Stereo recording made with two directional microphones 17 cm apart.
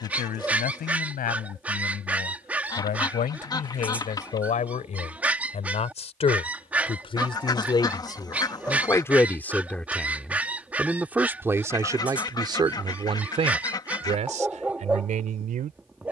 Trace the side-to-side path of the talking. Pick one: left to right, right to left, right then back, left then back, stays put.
left to right.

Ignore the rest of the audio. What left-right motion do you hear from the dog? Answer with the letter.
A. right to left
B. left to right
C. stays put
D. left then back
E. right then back
C.